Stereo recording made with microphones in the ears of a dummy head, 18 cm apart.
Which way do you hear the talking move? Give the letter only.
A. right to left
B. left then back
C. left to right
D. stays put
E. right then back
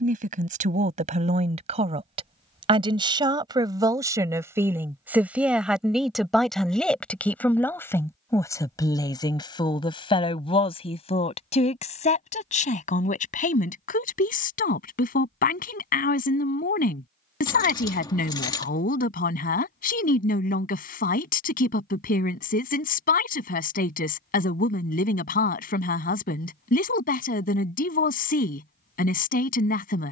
A.